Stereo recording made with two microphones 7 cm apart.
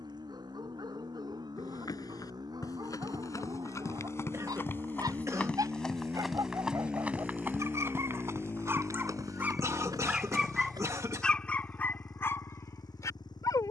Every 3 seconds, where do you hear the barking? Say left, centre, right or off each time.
right, right, right, centre, left.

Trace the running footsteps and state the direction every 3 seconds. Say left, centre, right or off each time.
left, left, right, right, off.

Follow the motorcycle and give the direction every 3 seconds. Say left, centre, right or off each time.
right, right, centre, left, left.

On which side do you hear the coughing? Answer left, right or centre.
right.